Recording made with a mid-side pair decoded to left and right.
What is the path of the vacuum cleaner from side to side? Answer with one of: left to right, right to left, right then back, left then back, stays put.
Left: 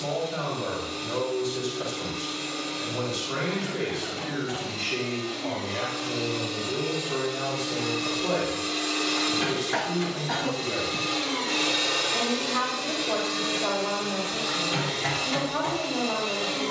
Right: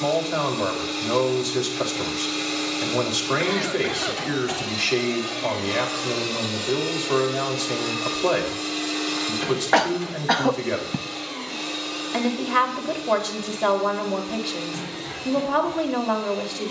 right to left.